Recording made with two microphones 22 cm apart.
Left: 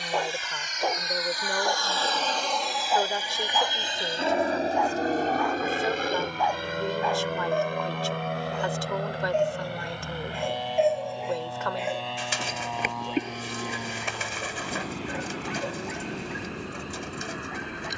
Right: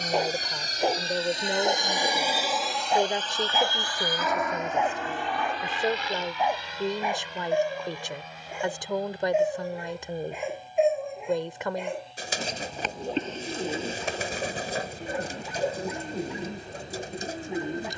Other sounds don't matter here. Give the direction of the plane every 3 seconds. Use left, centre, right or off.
right, left, left, left, left, left.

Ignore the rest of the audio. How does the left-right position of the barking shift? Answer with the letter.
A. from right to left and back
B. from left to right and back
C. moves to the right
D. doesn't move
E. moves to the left
E.